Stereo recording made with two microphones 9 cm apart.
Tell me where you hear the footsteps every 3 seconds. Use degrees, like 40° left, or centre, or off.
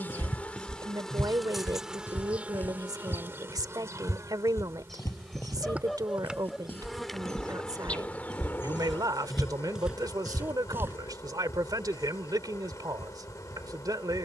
10° left, 30° left, 10° left, 10° right, off.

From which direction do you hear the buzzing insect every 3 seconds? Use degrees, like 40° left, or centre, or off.
centre, 30° right, 10° left, 30° left, 40° left.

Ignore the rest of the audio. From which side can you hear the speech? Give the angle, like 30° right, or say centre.
40° right.